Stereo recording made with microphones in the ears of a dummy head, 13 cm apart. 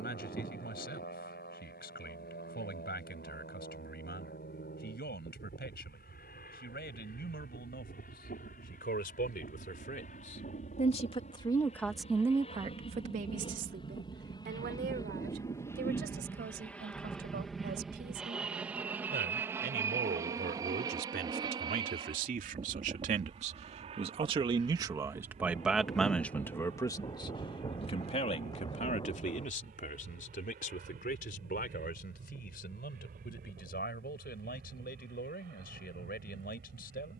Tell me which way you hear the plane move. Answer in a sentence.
In this clip you hear the plane move to the right.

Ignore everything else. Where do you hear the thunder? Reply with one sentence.
You can hear the thunder on the left.